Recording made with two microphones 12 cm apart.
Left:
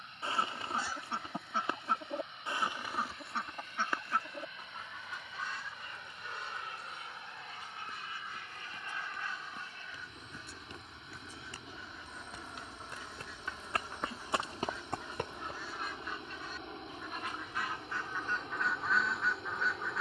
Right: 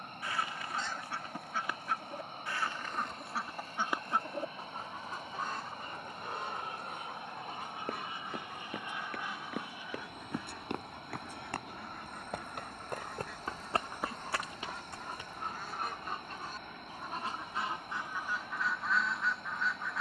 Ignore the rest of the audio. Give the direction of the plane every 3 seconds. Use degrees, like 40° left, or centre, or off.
40° right, 40° right, 20° right, 10° right, 10° left, 30° left, 40° left.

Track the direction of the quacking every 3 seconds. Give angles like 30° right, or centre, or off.
30° left, 30° right, 60° right, 70° right, 70° right, 40° right, centre.